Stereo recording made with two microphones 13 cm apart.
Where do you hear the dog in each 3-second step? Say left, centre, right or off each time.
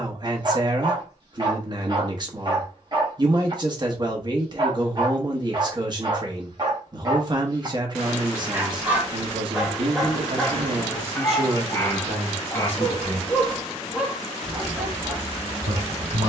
right, right, right, centre, centre, right.